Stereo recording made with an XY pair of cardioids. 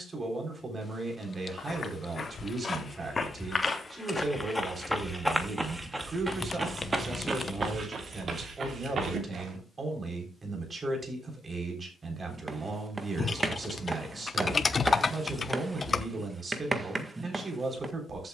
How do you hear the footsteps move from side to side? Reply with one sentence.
In this clip you hear the footsteps move to the right.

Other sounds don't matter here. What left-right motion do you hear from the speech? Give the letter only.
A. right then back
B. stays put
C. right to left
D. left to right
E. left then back
B.